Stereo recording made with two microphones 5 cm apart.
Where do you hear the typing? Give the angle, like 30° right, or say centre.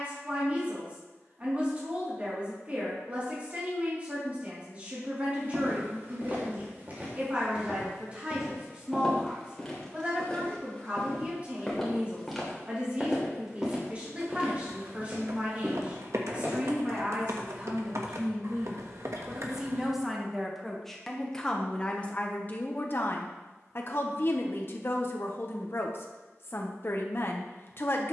70° right.